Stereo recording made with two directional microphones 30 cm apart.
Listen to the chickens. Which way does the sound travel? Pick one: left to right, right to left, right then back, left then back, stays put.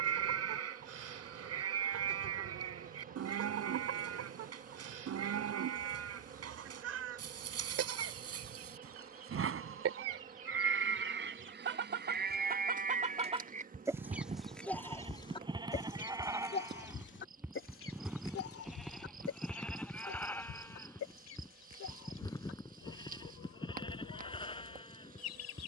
right to left.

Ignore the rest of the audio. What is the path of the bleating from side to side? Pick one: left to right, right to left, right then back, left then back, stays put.
right to left.